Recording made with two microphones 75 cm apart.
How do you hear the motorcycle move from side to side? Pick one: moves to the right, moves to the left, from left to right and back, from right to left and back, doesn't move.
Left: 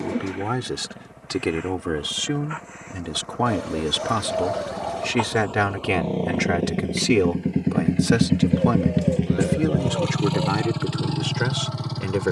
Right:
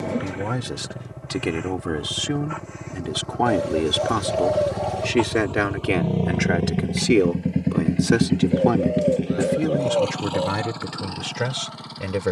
moves to the left.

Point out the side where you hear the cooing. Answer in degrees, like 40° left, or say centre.
20° right.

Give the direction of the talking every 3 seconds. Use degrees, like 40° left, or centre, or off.
centre, 20° left, 20° left, 10° right.